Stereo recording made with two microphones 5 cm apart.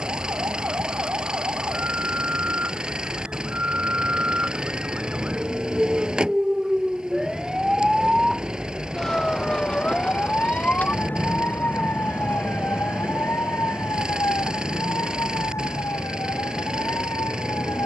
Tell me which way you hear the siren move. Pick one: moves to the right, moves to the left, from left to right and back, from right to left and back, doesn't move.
moves to the left.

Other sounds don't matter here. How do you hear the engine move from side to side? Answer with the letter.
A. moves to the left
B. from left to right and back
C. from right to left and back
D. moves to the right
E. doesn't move
E.